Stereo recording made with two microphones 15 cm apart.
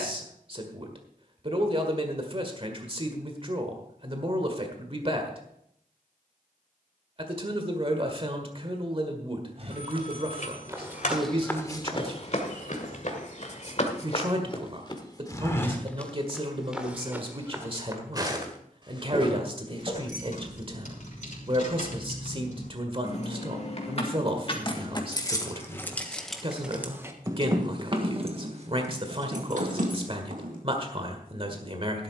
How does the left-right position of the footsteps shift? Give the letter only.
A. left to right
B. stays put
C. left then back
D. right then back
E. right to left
C.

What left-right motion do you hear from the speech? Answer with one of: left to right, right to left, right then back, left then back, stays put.
stays put.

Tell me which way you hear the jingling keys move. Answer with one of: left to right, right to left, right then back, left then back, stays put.
left to right.